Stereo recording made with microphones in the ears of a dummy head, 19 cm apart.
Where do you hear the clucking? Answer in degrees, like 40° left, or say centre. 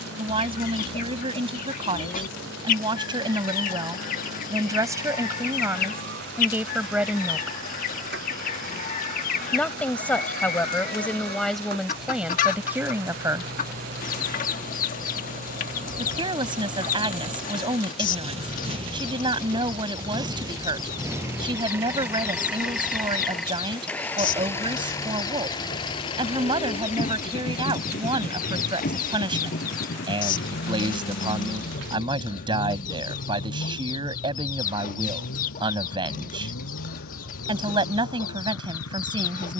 40° left.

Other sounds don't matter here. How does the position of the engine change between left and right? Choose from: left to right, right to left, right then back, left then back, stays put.
right to left.